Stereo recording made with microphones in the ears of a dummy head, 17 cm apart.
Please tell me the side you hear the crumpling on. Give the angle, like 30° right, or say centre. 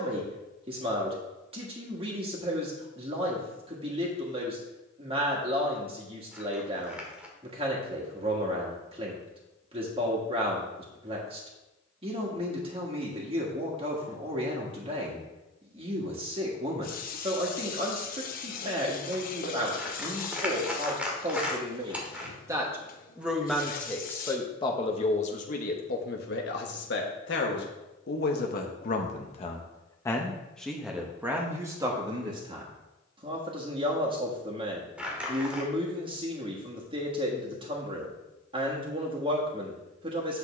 10° right.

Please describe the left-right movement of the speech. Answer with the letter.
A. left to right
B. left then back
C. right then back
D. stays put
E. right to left
B.